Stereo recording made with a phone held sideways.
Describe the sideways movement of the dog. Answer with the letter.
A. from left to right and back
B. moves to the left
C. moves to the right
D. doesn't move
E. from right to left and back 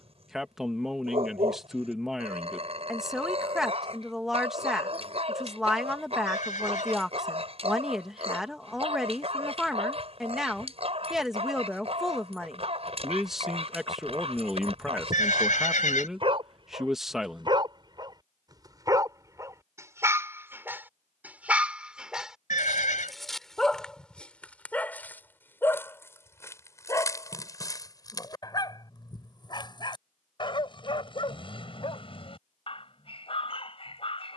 B.